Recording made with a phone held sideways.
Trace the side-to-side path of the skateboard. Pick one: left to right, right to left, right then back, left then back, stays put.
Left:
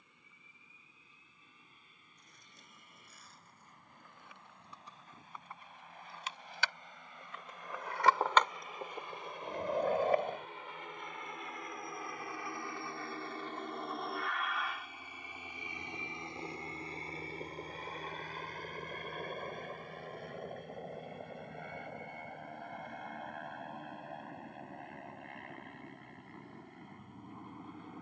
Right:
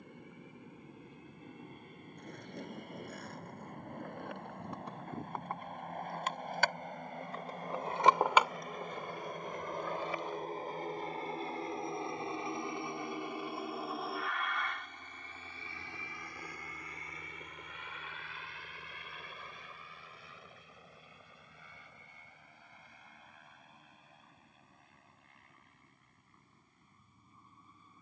right to left.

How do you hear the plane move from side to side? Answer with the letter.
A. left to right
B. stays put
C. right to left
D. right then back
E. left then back
C.